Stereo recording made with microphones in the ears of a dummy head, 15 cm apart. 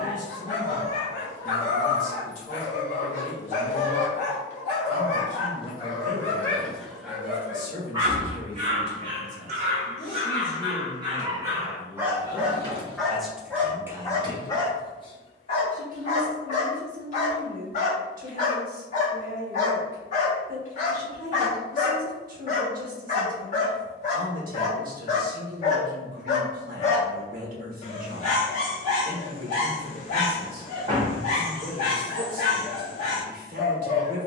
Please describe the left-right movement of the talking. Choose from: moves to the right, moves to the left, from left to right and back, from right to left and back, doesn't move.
moves to the right.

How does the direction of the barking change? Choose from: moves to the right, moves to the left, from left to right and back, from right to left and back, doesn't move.
from left to right and back.